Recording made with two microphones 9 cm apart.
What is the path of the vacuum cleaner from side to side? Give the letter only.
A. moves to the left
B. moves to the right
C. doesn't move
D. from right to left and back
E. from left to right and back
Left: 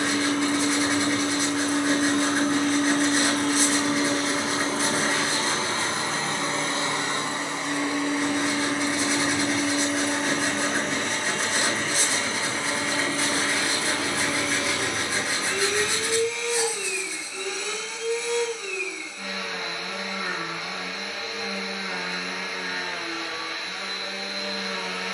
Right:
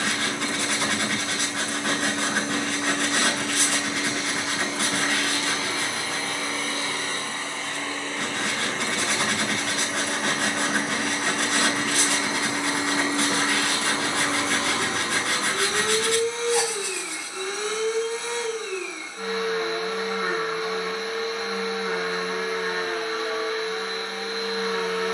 B.